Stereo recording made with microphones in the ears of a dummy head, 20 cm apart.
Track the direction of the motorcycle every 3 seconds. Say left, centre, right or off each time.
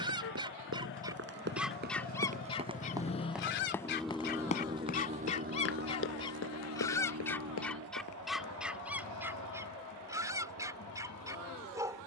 left, centre, right, right.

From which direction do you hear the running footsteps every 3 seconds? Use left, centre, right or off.
right, left, left, off.